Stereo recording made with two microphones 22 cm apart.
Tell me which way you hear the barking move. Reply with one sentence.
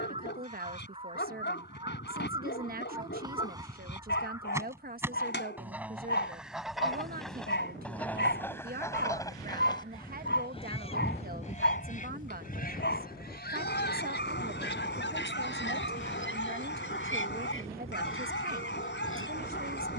In this clip you hear the barking stay in one place.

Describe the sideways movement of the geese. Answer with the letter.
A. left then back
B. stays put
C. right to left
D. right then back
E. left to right
C.